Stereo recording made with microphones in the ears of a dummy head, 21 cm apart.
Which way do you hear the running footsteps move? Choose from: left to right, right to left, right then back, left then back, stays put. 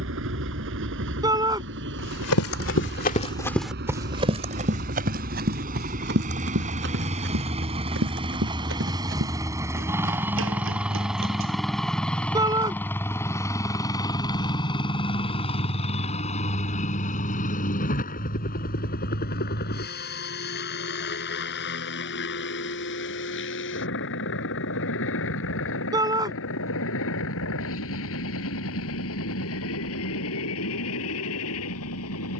left to right.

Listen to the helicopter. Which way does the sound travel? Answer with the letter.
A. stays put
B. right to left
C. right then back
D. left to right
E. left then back
B.